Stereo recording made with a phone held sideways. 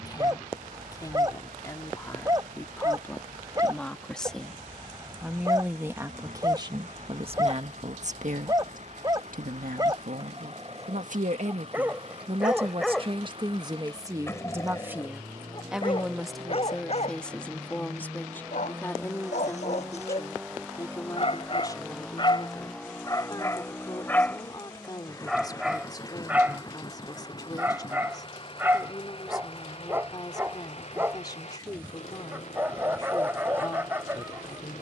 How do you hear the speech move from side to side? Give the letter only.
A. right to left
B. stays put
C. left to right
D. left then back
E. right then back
E.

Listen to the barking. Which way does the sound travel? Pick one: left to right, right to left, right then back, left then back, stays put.
left then back.